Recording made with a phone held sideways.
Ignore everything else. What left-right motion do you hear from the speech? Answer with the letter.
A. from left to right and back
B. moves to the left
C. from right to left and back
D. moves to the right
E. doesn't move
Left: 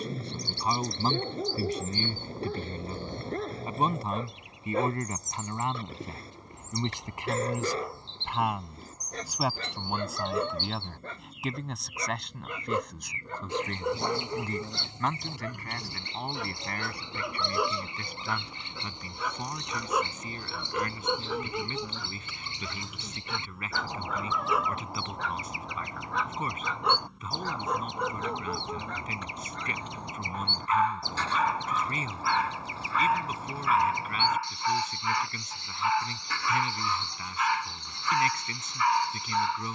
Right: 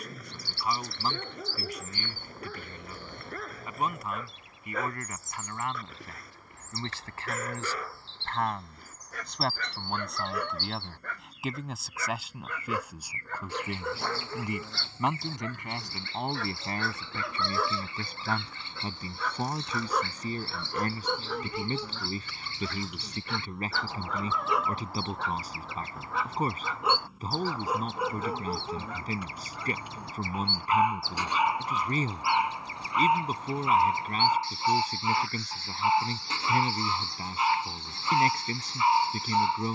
D.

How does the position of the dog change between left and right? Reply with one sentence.
In this clip you hear the dog move to the right.